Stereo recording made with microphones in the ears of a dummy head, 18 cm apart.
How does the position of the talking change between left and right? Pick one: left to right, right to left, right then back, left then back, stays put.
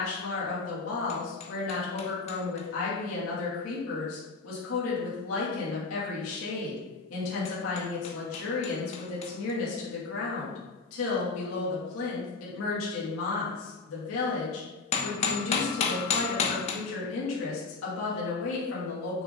stays put.